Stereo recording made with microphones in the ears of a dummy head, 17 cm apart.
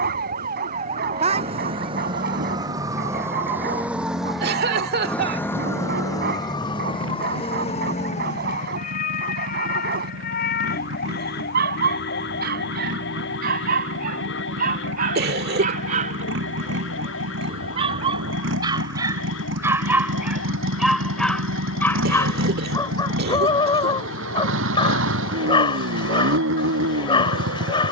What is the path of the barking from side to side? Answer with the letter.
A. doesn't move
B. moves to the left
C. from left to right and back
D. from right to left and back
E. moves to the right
B.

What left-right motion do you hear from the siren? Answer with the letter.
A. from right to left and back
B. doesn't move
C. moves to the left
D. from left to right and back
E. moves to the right
C.